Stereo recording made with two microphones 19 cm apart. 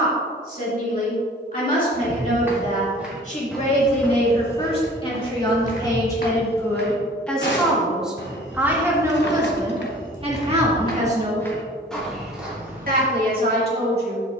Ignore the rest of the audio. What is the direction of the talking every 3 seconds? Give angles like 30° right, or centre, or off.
50° left, 30° left, centre, 30° right, 60° right.